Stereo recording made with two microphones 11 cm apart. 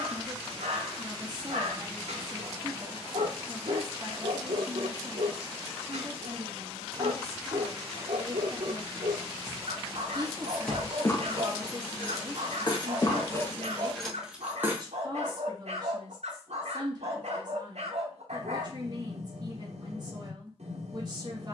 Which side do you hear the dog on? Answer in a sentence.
You can hear the dog on the right.